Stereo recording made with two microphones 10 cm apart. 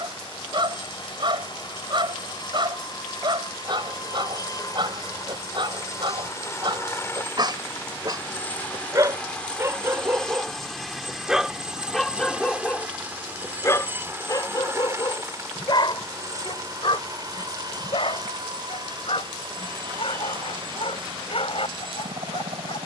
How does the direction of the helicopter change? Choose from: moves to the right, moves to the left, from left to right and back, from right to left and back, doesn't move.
moves to the right.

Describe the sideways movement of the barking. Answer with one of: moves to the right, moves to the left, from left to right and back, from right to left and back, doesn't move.
moves to the left.